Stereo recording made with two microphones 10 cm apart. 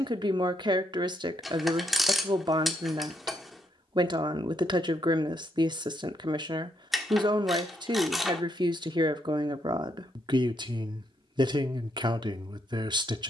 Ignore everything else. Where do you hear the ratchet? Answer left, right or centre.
centre.